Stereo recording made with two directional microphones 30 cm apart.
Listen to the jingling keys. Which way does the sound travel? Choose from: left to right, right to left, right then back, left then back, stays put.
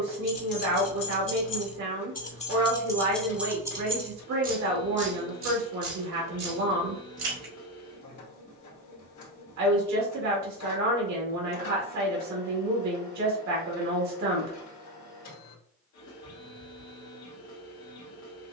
left to right.